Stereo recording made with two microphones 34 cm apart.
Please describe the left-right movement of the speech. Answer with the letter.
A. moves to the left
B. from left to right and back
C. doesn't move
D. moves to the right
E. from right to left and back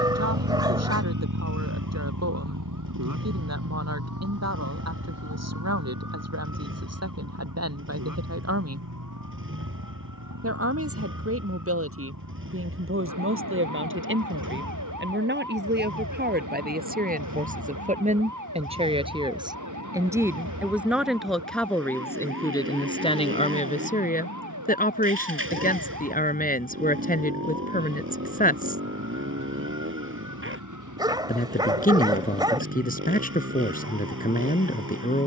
A.